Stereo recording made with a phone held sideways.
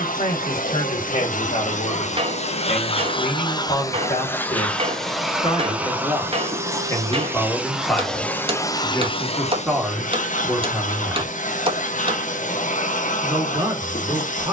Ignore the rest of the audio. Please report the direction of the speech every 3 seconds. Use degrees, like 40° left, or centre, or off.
50° left, 40° left, 20° left, 10° right, 20° right.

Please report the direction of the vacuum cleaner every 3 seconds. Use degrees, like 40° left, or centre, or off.
60° left, 10° left, centre, 60° left, 60° left.